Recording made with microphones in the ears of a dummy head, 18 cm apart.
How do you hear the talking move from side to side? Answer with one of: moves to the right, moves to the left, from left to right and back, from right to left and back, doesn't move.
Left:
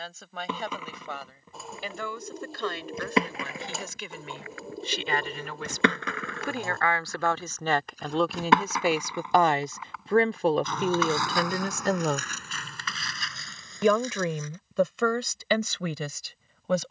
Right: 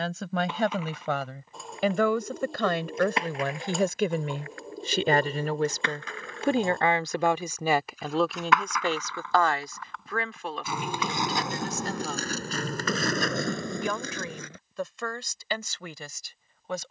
moves to the left.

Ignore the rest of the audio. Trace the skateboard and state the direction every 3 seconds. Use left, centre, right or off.
left, left, left, centre, right, off.